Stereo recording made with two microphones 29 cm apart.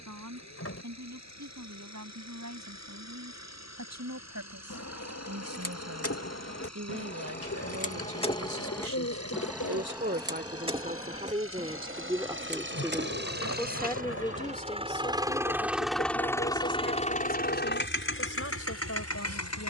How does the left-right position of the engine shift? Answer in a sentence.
In this clip you hear the engine move from right to left.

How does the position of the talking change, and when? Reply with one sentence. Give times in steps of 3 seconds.
In this clip you hear the talking on the right from 0 s, in the centre from 12 s and on the left from 15 s.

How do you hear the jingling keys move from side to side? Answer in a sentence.
In this clip you hear the jingling keys travel towards the right.